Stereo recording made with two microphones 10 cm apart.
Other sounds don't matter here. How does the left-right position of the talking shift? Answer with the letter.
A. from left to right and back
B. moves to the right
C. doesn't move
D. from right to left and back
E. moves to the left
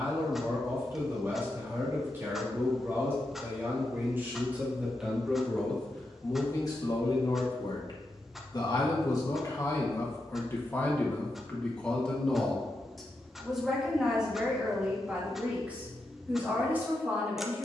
D.